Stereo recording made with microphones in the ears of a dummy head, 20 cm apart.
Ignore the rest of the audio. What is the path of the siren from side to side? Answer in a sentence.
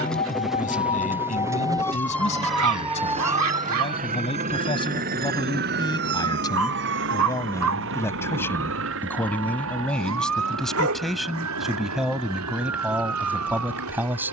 In this clip you hear the siren move to the right.